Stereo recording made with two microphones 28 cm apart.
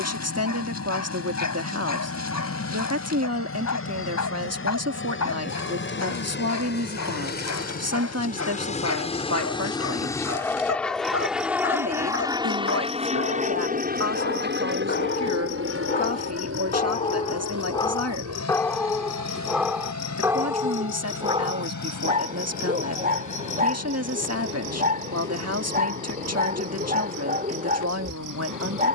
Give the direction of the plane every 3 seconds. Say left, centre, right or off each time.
left, left, left, centre, right, right, right, right, right, right.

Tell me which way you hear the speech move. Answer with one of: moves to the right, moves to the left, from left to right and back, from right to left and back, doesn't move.
doesn't move.